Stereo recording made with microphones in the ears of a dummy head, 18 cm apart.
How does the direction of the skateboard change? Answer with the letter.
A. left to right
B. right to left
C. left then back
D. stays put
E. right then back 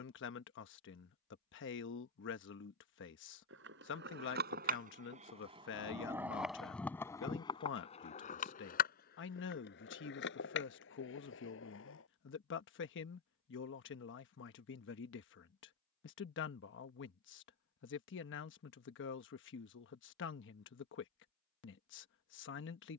B.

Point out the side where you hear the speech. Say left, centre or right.
left.